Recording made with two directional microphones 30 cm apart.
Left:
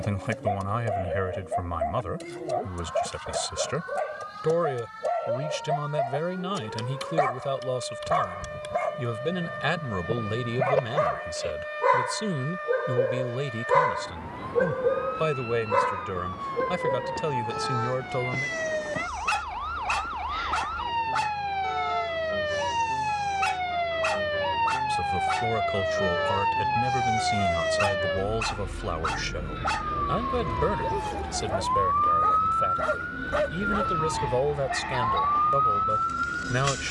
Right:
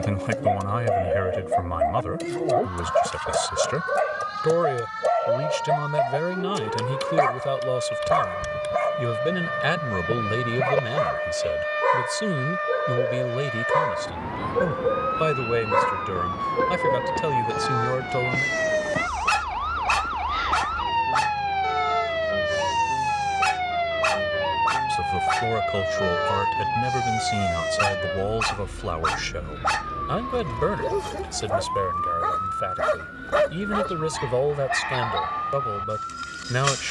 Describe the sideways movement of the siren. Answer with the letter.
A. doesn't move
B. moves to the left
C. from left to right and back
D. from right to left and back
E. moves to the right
B.